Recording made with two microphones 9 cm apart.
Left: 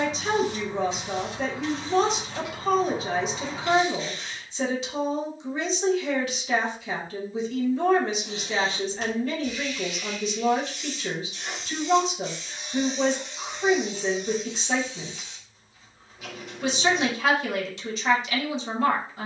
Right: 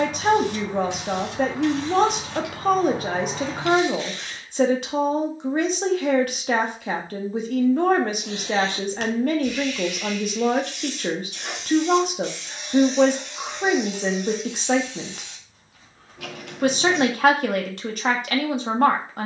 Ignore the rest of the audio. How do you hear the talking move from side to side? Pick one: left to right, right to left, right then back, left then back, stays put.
stays put.